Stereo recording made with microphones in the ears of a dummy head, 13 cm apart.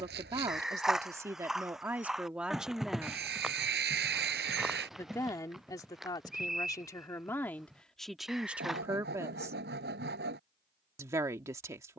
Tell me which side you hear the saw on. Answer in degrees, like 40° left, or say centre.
80° right.